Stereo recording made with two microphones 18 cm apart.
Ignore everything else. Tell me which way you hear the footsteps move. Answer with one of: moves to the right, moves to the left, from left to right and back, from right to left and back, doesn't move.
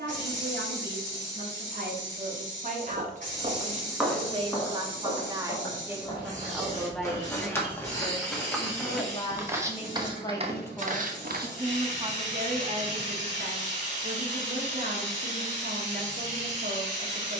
from right to left and back.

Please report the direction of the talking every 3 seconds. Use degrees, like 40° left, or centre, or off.
50° right, 30° right, 10° left, 10° left, 50° right, 50° right.